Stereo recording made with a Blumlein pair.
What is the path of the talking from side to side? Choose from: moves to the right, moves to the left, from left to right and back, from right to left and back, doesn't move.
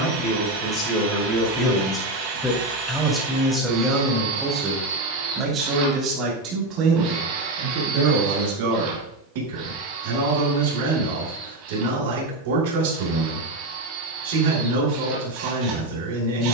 moves to the right.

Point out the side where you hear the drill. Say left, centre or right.
right.